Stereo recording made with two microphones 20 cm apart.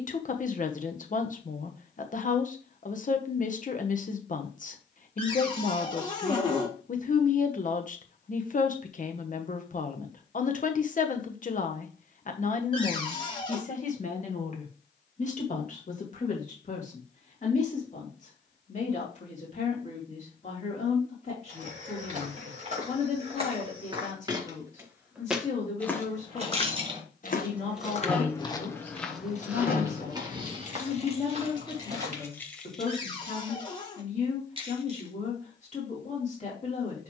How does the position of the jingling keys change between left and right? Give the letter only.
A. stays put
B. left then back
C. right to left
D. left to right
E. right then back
B.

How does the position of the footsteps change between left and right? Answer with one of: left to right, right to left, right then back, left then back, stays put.
left then back.